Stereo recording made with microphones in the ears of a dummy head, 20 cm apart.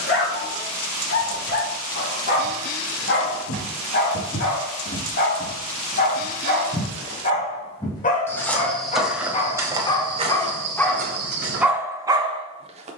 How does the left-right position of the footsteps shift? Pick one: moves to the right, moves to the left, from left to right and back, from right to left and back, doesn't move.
moves to the right.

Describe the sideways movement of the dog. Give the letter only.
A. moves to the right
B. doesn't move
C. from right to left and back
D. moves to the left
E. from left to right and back
A.